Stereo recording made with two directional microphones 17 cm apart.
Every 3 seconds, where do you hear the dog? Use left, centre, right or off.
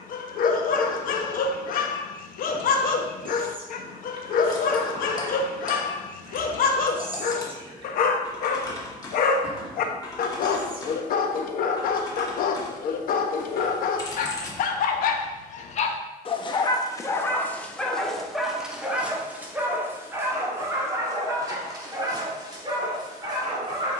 left, left, left, left, left, left, centre, right.